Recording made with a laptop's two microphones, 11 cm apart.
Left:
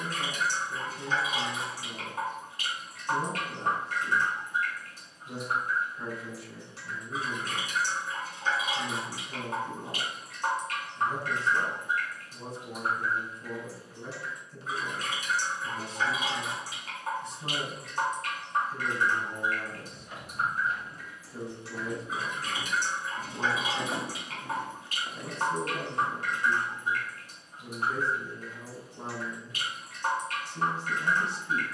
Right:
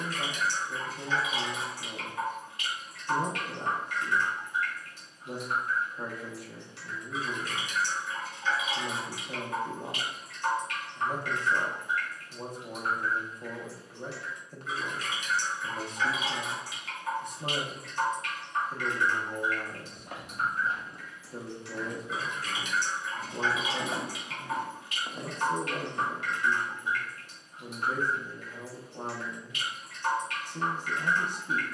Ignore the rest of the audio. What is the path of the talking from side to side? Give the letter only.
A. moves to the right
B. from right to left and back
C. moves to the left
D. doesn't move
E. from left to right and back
D.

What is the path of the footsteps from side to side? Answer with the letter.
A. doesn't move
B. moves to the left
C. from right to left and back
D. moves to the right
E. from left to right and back
C.